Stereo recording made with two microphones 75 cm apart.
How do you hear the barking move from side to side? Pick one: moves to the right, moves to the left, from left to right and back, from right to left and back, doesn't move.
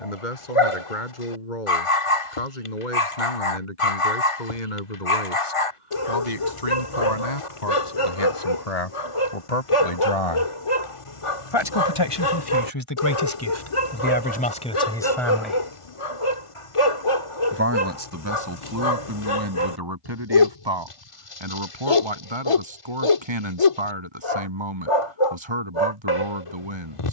doesn't move.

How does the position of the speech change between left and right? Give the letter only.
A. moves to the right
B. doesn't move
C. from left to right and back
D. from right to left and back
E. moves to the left
A.